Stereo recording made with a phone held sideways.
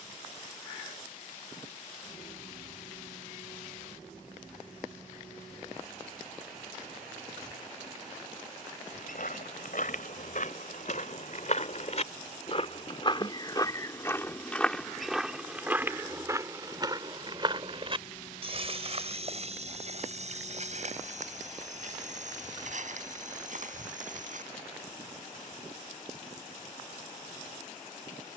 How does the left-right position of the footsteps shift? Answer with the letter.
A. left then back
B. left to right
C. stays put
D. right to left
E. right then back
B.